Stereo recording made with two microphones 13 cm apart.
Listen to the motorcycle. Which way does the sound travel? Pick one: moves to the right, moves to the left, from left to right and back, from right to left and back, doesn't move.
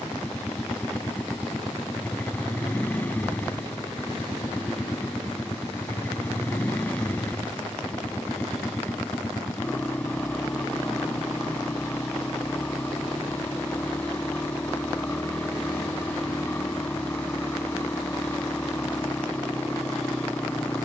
doesn't move.